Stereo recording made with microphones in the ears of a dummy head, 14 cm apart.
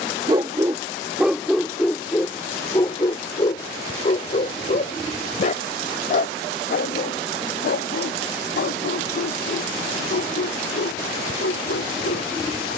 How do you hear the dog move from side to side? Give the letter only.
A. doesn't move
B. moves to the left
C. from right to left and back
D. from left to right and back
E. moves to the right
B.